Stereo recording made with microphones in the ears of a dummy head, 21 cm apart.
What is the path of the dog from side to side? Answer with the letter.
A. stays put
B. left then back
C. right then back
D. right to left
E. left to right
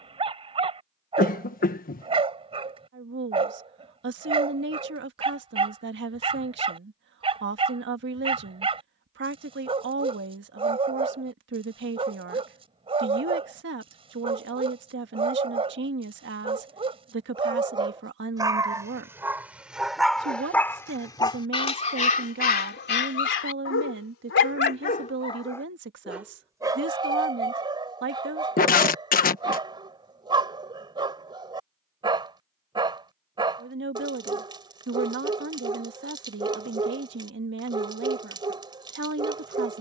B.